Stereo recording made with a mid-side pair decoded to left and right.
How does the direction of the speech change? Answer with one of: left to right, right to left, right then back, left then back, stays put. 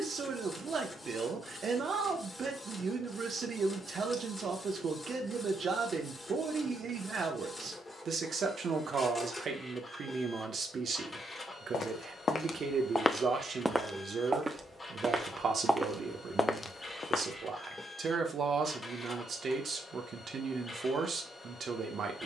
stays put.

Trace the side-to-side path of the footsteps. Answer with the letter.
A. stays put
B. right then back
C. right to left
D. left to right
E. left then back
B.